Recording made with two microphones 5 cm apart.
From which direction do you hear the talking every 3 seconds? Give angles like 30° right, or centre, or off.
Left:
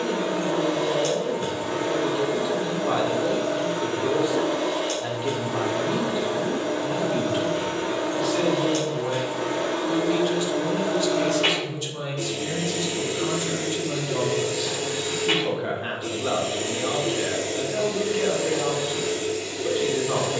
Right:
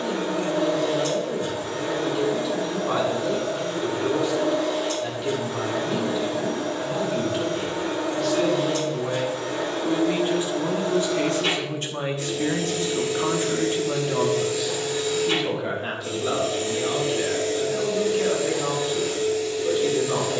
20° left, 20° left, 10° left, 20° right, 30° right, 10° left, 10° left.